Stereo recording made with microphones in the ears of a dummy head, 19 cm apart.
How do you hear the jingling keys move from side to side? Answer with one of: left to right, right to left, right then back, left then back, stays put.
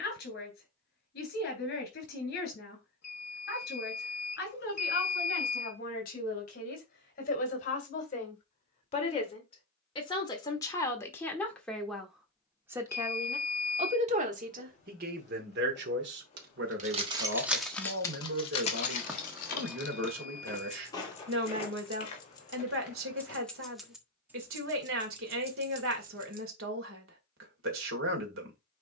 left then back.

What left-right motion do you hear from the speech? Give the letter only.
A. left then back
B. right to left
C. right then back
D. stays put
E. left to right
E.